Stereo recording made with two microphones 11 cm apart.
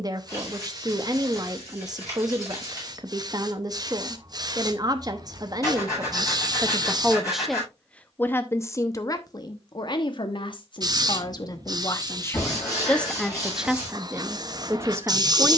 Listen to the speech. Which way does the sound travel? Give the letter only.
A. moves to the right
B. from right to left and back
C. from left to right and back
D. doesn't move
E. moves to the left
B.